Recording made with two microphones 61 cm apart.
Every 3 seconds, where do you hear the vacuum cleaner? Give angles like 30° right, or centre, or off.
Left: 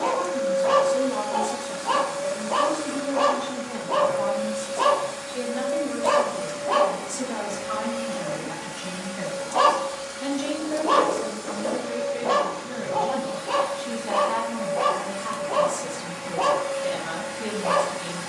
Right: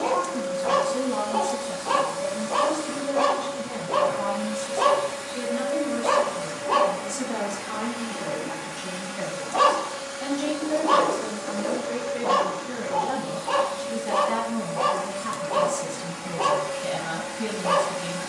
30° right, 30° right, centre, 40° left, 40° left, 10° right.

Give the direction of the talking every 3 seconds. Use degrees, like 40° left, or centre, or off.
60° right, 40° right, centre, 20° right, 50° right, 60° right.